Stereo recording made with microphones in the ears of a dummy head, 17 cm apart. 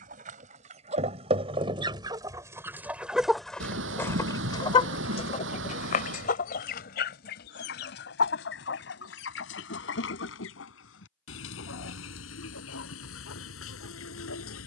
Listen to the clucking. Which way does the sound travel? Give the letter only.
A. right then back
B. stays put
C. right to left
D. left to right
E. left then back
C.